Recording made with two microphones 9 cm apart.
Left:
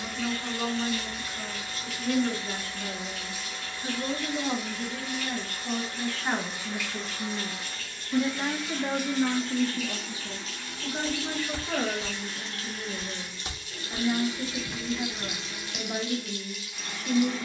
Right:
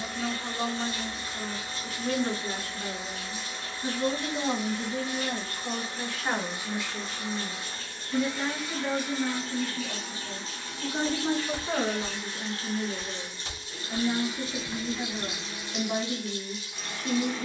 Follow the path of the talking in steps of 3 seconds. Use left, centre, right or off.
right, right, centre, centre, right, right.